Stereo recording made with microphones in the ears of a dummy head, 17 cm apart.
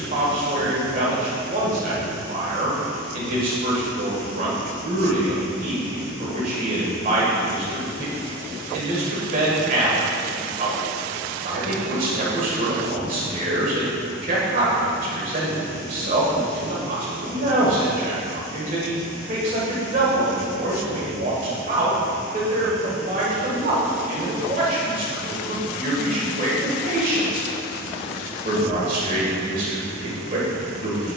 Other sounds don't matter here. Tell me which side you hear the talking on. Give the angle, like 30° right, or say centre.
40° right.